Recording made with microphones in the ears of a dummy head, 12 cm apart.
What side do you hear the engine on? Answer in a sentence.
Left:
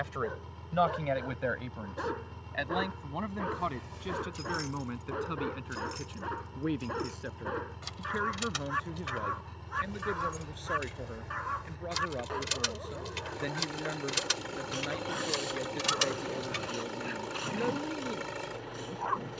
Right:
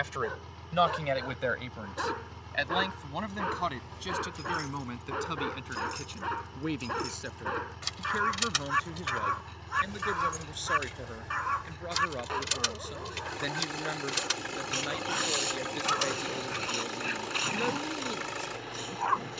You can hear the engine on the right.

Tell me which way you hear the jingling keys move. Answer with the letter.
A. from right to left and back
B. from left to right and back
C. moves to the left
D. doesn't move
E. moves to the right
B.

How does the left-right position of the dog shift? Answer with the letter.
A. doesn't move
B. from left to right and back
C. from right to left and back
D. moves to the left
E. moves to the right
A.